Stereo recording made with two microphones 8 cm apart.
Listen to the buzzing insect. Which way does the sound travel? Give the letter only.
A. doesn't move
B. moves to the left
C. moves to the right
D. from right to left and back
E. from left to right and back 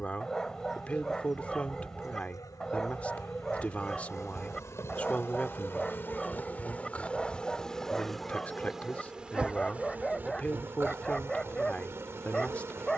C.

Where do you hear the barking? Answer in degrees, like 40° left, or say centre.
10° left.